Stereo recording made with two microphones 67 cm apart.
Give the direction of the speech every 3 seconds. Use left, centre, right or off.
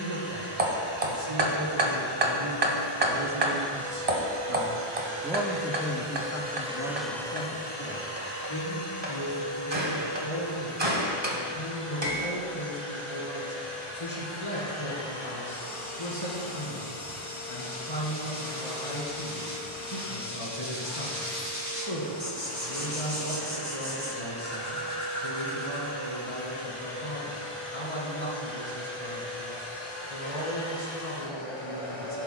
right, right, left, left, left, left, left, left, left, left, left.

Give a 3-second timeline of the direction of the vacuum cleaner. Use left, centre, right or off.
right, right, centre, left, left, left, left, left, left, left, left.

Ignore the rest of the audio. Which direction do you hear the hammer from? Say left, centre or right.
right.